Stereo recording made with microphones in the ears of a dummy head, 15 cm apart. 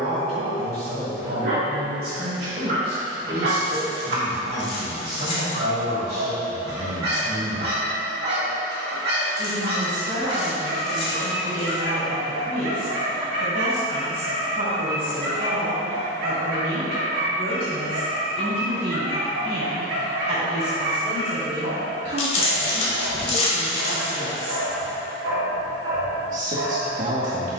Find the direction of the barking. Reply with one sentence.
You can hear the barking on the right.